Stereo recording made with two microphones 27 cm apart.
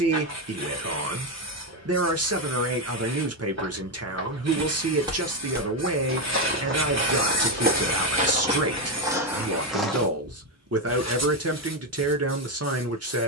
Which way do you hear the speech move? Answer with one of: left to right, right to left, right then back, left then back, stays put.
stays put.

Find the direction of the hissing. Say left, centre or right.
right.